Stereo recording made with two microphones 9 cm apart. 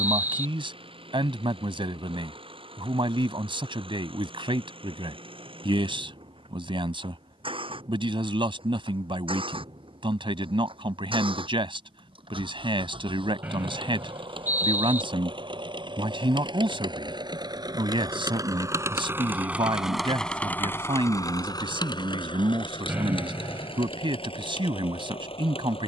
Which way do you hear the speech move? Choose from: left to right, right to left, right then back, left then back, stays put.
stays put.